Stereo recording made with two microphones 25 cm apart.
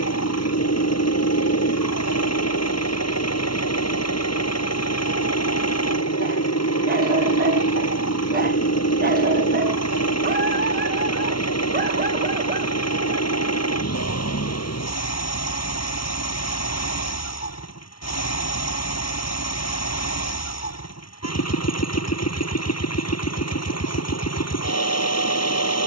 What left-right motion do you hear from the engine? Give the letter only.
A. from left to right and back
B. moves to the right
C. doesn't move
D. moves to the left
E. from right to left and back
C.